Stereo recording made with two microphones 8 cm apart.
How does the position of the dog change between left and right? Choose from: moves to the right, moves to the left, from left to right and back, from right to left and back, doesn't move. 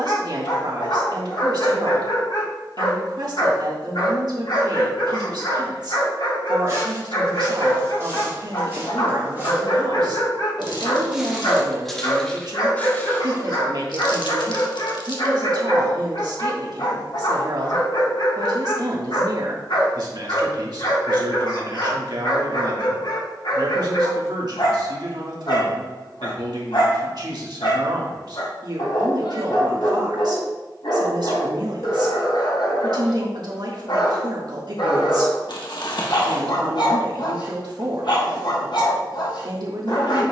doesn't move.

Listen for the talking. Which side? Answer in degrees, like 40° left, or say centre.
60° right.